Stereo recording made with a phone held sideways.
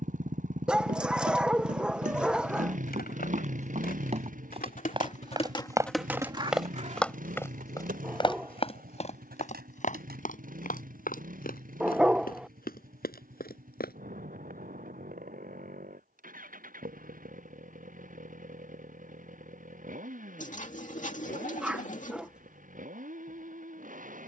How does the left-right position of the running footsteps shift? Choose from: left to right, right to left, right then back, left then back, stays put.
right to left.